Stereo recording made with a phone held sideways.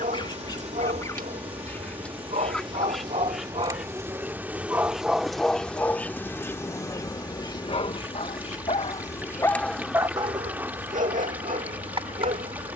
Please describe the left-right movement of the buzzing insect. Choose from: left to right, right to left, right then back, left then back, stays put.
left then back.